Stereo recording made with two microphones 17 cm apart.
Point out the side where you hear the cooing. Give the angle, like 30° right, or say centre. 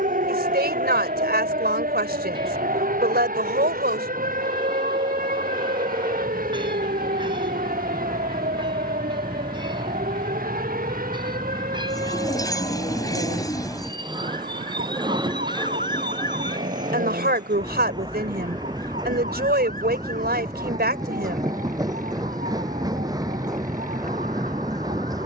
20° left.